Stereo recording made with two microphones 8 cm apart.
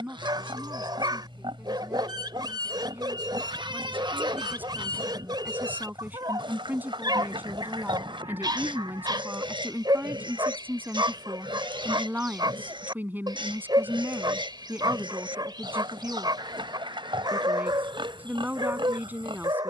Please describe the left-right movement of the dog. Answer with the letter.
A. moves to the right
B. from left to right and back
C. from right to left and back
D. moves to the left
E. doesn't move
E.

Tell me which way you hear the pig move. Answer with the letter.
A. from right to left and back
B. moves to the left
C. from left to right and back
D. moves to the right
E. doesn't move
E.